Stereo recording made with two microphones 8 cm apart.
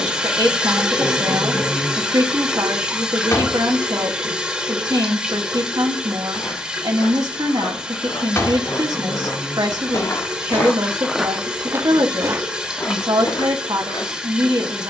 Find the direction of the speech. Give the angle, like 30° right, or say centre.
60° right.